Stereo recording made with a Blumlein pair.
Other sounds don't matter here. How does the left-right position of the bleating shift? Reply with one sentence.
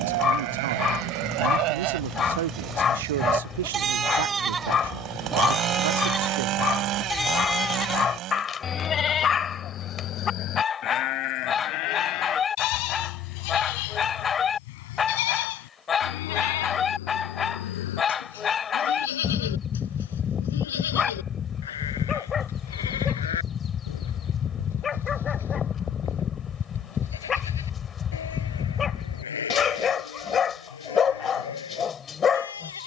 In this clip you hear the bleating go from the right side to the left.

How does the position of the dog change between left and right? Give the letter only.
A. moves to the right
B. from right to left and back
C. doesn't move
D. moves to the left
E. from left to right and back
C.